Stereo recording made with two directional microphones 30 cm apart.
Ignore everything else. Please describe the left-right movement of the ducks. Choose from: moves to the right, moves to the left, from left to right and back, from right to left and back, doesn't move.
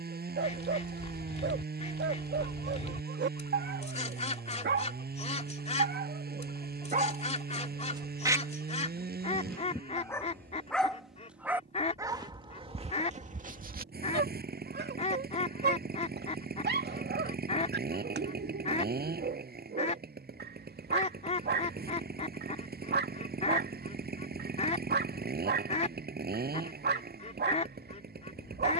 doesn't move.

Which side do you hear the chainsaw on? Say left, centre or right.
right.